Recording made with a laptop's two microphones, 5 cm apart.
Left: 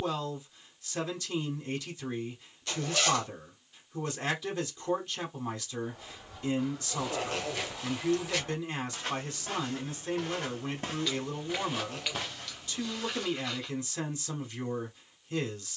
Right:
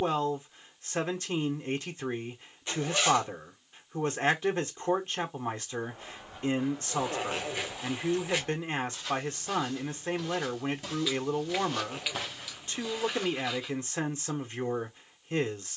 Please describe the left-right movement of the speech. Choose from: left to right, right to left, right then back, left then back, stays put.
stays put.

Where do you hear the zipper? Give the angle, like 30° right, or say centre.
20° right.